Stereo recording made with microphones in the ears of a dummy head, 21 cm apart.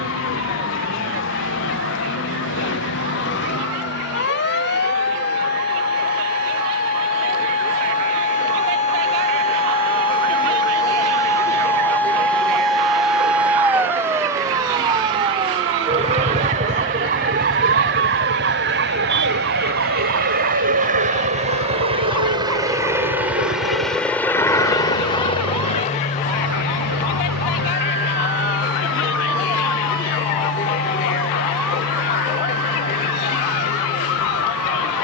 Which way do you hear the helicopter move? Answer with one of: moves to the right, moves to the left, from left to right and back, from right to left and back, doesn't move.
moves to the left.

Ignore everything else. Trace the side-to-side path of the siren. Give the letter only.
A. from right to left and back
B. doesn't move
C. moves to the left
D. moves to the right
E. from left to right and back
D.